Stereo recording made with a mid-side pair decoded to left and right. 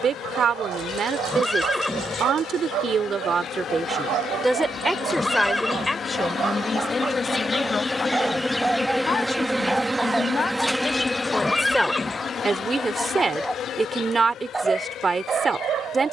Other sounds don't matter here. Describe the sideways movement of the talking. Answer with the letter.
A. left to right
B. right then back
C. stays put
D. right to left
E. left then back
E.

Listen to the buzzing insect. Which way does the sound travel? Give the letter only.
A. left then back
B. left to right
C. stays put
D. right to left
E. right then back
E.